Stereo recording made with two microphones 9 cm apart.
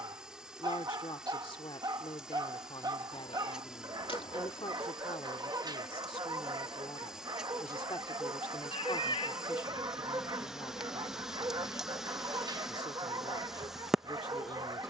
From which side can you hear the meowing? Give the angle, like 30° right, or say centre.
80° left.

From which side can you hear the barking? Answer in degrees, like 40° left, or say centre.
50° right.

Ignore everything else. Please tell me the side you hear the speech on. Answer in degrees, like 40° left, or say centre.
70° left.